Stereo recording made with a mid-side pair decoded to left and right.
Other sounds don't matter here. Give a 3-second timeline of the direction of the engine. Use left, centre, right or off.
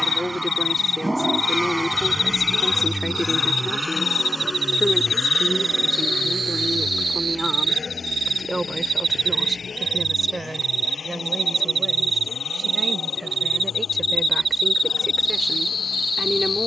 centre, left, left, left, left, left.